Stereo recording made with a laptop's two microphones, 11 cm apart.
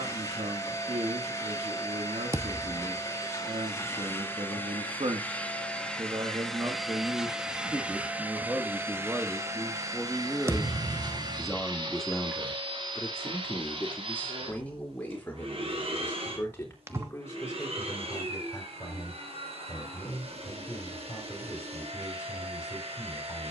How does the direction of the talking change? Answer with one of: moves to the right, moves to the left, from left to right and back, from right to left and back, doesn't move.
moves to the left.